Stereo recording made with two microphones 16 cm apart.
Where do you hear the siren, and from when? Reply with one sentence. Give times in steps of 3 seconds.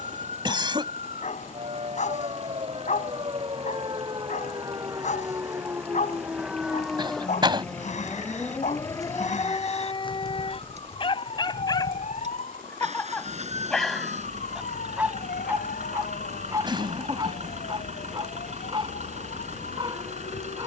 In this clip you hear the siren on the right from 0 s, in the centre from 6 s and on the left from 9 s.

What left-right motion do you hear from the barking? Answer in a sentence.
You can hear the barking move to the right.